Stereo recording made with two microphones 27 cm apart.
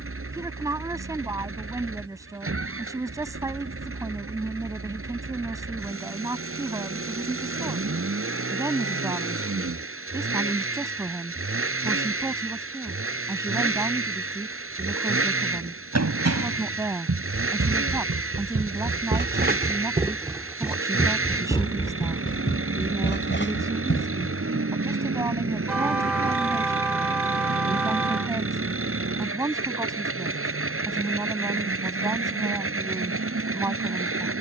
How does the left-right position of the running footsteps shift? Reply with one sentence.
You can hear the running footsteps go from the right side to the left.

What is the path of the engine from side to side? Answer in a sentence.
In this clip you hear the engine stay put.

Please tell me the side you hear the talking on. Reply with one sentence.
You can hear the talking in the centre.